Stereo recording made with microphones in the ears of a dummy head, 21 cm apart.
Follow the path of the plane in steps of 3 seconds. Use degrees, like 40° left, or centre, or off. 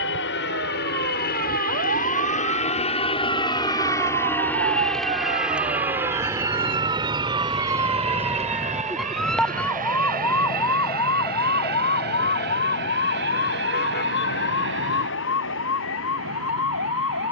40° left, 10° left, 20° right, 40° right, 50° right, 50° right.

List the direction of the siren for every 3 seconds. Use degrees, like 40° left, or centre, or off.
50° right, 30° right, 20° right, 10° left, 40° left, 60° left.